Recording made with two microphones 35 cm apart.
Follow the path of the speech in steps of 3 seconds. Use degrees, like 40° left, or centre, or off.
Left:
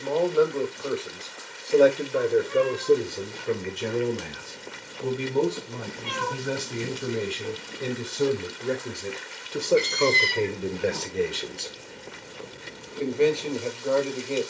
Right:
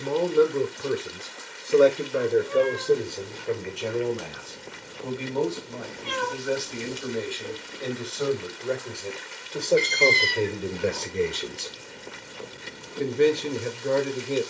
10° right, 30° left, 40° left, centre, 30° right.